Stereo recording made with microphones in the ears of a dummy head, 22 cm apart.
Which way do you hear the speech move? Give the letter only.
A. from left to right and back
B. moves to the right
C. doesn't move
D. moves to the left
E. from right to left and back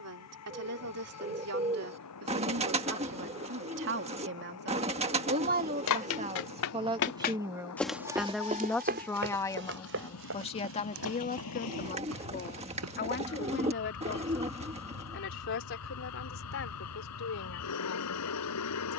D.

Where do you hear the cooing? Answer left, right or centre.
right.